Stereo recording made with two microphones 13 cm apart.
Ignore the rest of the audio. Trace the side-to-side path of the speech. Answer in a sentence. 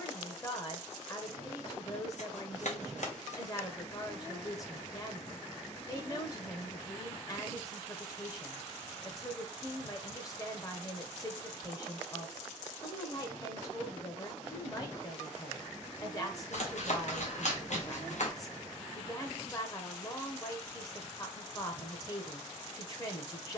You can hear the speech stay put.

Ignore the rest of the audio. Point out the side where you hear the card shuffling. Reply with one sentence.
You can hear the card shuffling on the left.